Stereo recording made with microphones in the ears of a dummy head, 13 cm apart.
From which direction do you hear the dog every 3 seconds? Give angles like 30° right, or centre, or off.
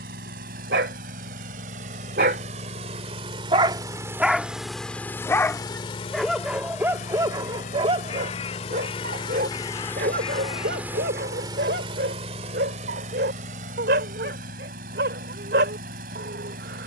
80° right, centre, 30° right, 70° right, 80° right, 80° right.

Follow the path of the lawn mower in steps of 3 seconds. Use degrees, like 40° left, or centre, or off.
60° right, centre, 50° left, centre, 50° right, 60° right.